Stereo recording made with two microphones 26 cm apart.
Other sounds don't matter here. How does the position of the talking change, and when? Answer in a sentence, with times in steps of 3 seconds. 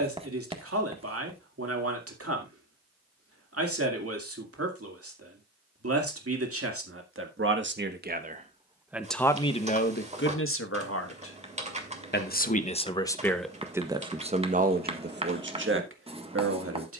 You can hear the talking on the right from 0 s, on the left from 9 s, in the centre from 12 s and on the right from 15 s.